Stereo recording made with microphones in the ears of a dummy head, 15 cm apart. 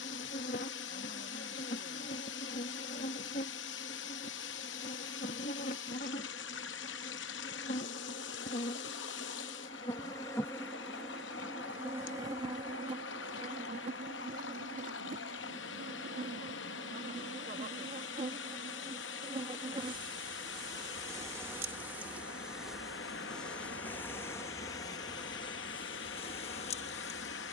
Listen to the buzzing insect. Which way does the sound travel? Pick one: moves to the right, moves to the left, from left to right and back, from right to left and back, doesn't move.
from left to right and back.